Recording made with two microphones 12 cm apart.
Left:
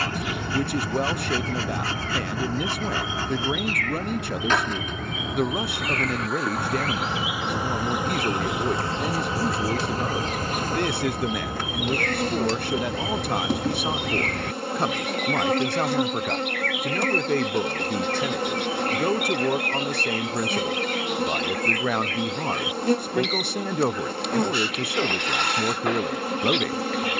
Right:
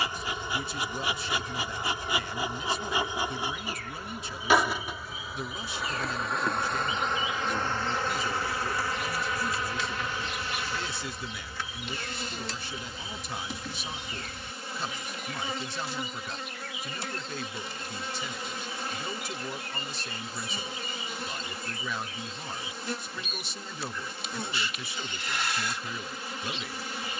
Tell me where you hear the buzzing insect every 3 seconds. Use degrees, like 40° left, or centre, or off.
20° right, 10° right, 10° left, 40° left, 60° left, 60° left, 60° left, 60° left, 60° left.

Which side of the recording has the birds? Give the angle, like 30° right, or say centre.
70° left.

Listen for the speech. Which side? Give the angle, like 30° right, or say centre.
60° left.